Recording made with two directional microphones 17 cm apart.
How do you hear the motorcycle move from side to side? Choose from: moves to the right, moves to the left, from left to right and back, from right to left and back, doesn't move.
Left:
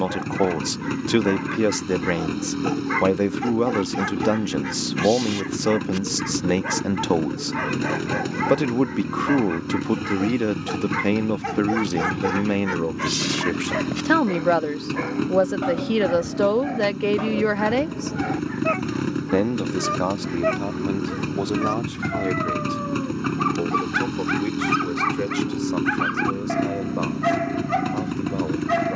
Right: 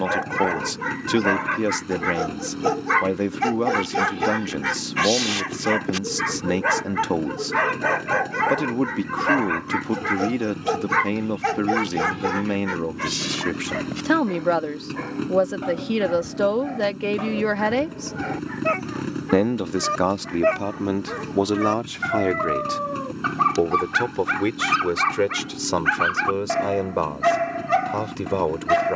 doesn't move.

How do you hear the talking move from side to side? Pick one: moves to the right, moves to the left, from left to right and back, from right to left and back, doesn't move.
moves to the right.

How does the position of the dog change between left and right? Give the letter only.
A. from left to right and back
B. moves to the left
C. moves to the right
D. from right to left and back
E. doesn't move
D.